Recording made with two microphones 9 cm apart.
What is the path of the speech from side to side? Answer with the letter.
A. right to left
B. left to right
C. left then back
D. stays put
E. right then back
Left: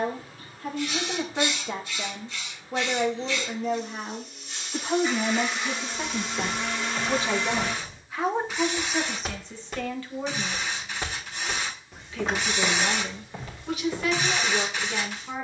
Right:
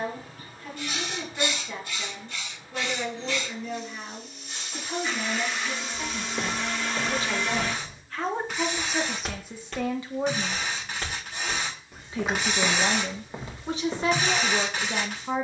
B.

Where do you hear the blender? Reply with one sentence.
In this clip you hear the blender in the centre.